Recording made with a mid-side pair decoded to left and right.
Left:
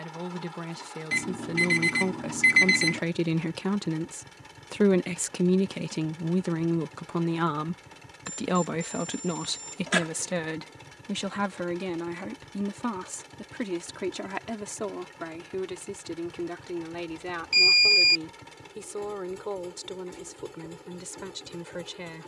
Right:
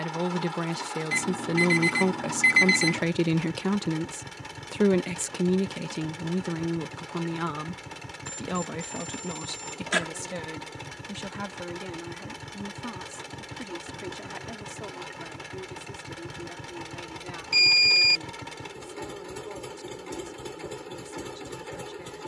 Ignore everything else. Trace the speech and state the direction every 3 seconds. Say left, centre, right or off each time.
right, centre, left, left, left, left, left, left.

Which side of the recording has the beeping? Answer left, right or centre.
centre.